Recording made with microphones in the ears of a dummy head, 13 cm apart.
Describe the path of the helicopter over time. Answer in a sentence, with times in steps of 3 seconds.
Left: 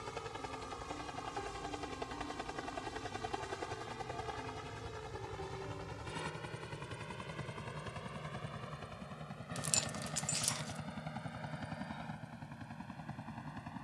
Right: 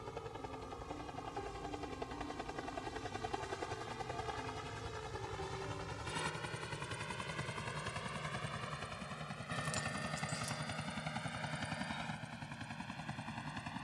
In this clip you hear the helicopter on the left from 0 s, in the centre from 3 s and on the right from 6 s.